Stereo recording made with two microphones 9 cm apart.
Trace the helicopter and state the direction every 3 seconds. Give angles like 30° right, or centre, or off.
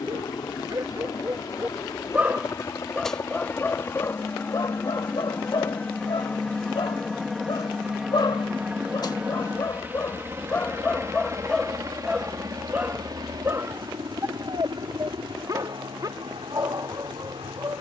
40° left, 20° left, centre, 20° right, 40° right, 60° right.